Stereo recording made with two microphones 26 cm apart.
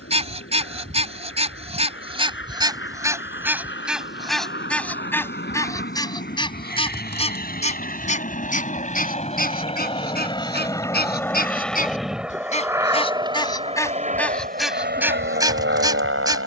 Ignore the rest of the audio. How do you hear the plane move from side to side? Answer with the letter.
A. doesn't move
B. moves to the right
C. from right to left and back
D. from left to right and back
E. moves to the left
B.